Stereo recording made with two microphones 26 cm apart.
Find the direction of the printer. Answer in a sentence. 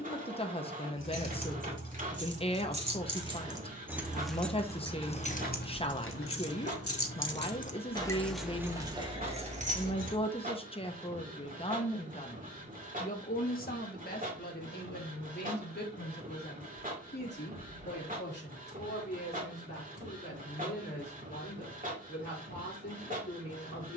You can hear the printer on the right.